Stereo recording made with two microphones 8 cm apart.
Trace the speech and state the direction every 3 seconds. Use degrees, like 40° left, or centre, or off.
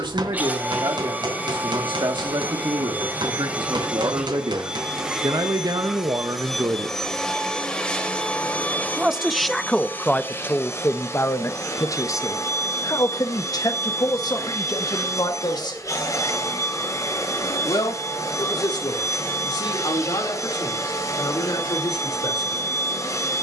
80° right, 70° right, 50° right, 20° left, 50° left, 60° left, 70° left, 70° left.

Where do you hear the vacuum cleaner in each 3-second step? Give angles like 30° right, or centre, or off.
20° right, 10° right, 10° left, 30° left, 40° left, 40° left, 40° left, 40° left.